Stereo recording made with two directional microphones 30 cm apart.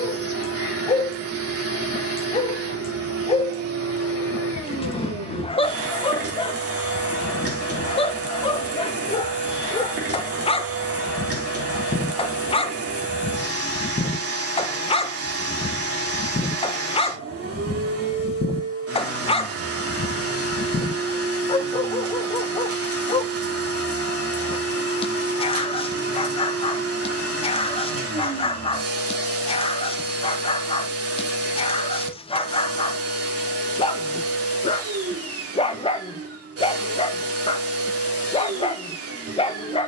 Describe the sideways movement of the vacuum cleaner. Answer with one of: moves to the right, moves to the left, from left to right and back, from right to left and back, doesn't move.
doesn't move.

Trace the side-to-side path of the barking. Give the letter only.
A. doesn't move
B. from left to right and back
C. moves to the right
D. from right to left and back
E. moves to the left
A.